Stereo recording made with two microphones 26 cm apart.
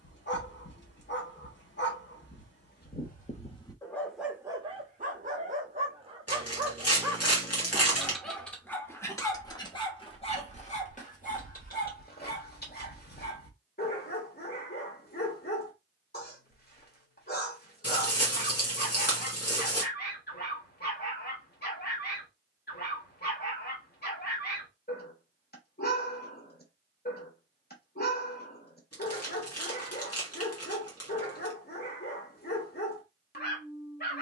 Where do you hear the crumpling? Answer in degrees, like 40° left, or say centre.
70° left.